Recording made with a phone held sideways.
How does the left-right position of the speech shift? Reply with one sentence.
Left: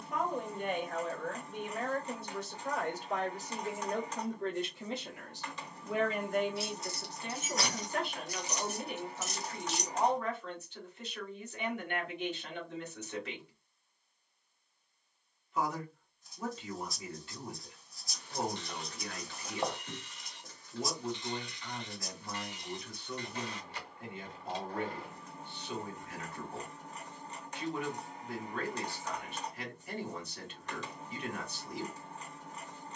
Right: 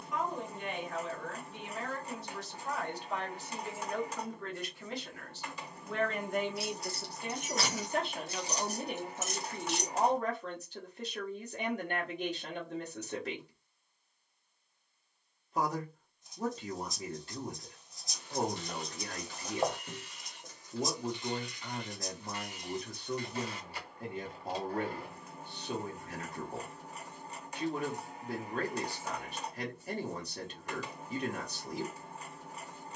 In this clip you hear the speech move from left to right.